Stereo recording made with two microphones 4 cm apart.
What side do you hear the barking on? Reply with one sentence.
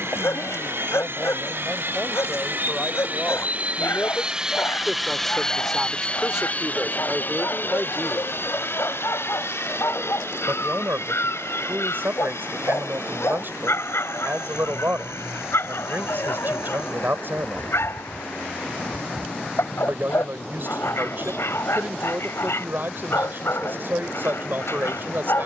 You can hear the barking on the left.